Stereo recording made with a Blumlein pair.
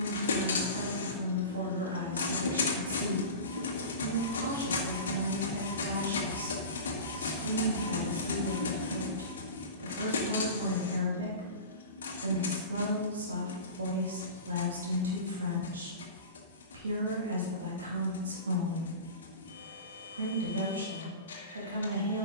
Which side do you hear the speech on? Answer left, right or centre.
right.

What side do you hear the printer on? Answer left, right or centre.
left.